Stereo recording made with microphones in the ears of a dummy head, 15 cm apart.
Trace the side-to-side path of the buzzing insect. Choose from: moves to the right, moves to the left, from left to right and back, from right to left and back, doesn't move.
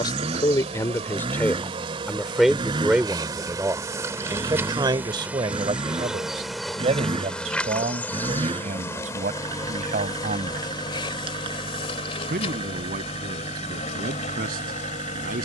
moves to the left.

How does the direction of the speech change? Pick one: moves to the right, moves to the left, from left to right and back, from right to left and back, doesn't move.
moves to the right.